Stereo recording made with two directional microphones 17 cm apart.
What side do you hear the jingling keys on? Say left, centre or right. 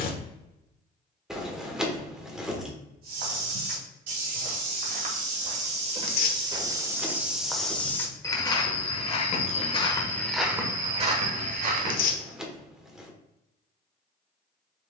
centre.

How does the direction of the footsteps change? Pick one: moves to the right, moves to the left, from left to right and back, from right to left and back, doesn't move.
from right to left and back.